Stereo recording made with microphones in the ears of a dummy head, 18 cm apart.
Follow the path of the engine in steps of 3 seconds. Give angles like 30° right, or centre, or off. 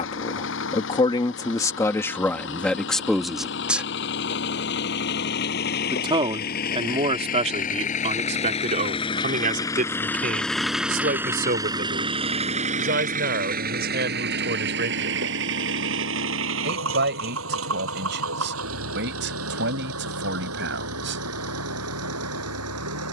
60° left, 60° left, 40° left, centre, 40° right, 70° right, 80° right, 80° right.